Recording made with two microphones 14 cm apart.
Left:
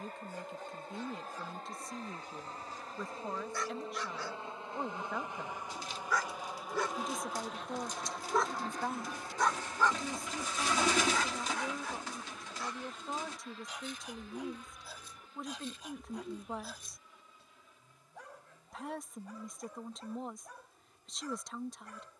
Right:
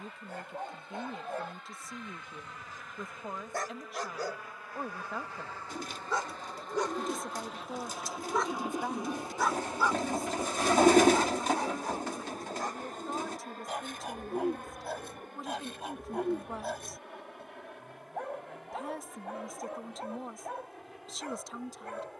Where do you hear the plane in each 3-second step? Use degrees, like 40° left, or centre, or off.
40° left, 30° left, centre, 30° right, 50° right, 60° right, 70° right, 70° right.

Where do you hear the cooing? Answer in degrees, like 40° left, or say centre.
50° right.